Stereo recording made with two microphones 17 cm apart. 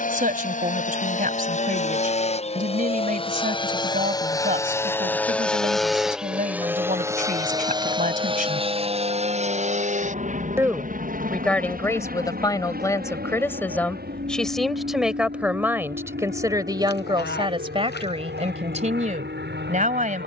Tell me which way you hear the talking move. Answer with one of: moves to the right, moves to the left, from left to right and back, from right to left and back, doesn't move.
from right to left and back.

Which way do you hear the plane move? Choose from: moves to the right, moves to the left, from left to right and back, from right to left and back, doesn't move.
moves to the right.